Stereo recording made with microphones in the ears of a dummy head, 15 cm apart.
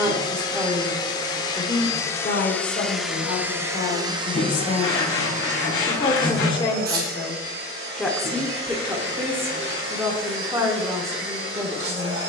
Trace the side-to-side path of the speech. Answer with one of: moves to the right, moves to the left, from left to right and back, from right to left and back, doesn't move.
from right to left and back.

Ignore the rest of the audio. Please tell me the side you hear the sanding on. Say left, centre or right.
left.